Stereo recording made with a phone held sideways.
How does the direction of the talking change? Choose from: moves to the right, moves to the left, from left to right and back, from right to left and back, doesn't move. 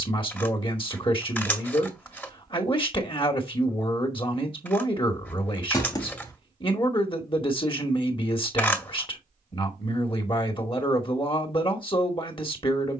doesn't move.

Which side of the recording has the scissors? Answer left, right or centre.
centre.